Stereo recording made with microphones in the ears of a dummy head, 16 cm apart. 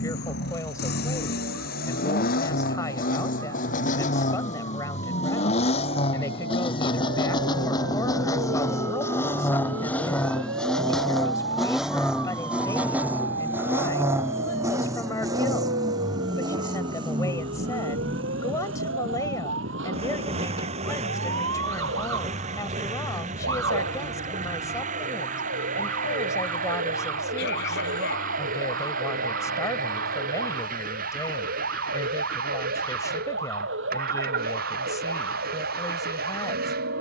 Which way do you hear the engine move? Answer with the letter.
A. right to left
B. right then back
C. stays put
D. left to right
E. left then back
D.